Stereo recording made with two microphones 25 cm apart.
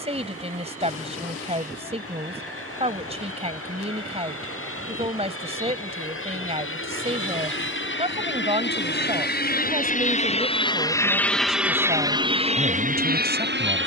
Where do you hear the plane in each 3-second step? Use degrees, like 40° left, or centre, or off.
80° left, 70° left, 60° left, 20° left, 30° right.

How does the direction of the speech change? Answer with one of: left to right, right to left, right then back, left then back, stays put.
stays put.